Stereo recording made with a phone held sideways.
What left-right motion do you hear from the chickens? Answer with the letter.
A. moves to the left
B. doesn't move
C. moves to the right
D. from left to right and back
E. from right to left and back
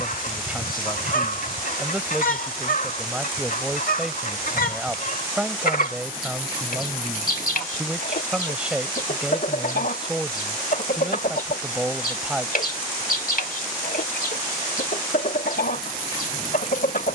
B.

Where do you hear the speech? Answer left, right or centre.
centre.